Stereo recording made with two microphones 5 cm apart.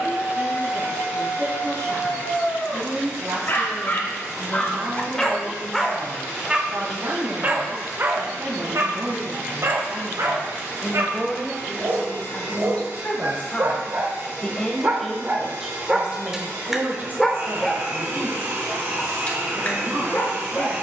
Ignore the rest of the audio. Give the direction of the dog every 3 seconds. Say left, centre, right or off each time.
left, left, right, right, right, centre, left.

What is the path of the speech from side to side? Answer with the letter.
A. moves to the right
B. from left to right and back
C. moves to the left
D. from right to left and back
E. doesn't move
D.